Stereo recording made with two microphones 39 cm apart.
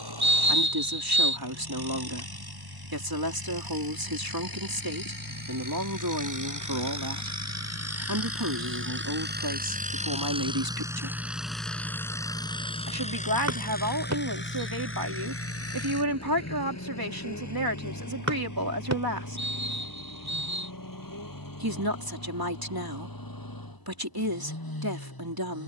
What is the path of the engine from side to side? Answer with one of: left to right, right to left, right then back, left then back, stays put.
right to left.